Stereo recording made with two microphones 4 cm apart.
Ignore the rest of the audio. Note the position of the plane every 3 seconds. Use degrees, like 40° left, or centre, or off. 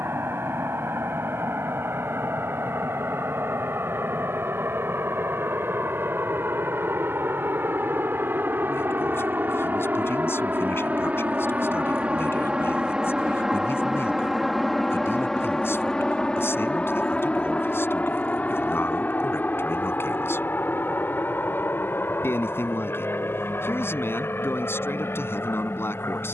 80° right, 70° right, 60° right, 40° right, 10° right, 20° left, 40° left, 50° left, 60° left.